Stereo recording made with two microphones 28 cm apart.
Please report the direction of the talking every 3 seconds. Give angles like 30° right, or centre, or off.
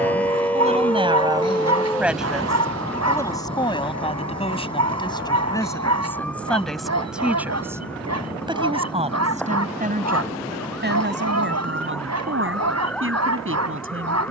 10° right, 20° left, centre, 30° right, 50° right.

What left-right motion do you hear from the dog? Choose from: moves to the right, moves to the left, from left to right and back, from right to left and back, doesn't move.
doesn't move.